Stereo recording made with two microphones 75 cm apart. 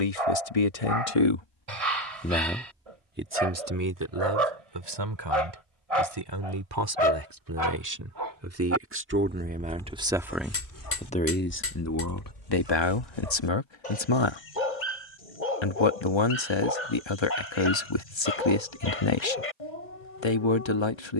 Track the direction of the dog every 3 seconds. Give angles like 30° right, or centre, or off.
50° right, 50° right, 40° right, 20° left, 60° left, 70° left, 70° left.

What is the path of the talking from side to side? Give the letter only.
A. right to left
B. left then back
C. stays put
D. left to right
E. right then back
E.